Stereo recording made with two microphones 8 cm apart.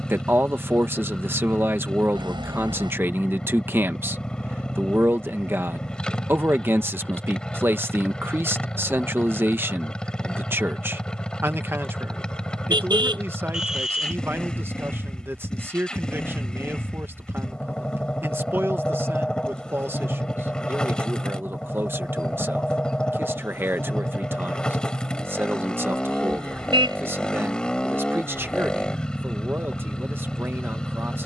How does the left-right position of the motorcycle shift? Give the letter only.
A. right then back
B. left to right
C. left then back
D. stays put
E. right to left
D.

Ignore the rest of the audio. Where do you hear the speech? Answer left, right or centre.
right.